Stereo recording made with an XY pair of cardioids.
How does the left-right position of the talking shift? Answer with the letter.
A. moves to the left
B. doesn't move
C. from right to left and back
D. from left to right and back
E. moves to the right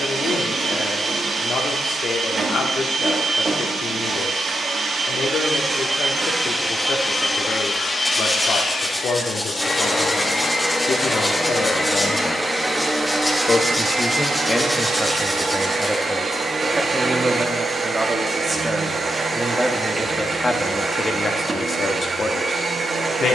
D.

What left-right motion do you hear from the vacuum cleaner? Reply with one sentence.
In this clip you hear the vacuum cleaner move from right to left and back again.